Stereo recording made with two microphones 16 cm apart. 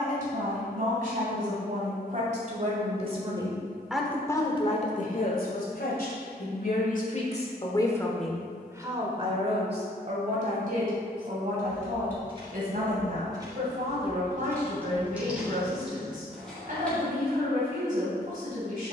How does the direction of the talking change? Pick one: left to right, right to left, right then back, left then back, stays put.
left then back.